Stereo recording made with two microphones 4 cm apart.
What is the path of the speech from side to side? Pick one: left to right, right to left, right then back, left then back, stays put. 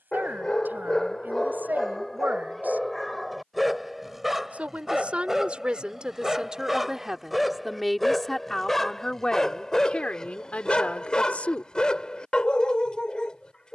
right to left.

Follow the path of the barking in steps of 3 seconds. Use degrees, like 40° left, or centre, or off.
10° left, 10° right, centre, 20° left, 20° left.